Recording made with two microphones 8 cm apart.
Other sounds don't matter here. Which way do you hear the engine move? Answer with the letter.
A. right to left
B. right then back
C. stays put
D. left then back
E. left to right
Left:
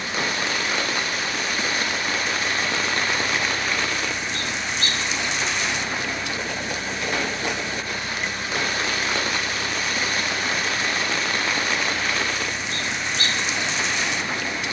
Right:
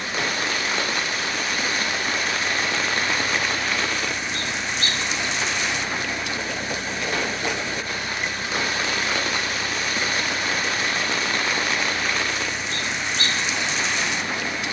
C.